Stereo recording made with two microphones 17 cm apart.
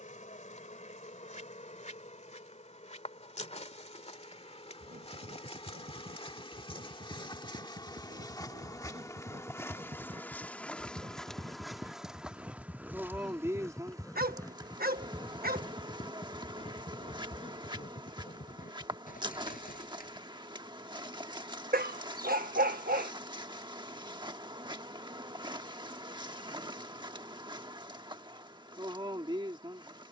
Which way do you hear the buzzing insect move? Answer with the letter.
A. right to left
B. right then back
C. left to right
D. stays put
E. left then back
C.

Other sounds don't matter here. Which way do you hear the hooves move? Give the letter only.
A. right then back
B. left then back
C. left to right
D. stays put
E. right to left
E.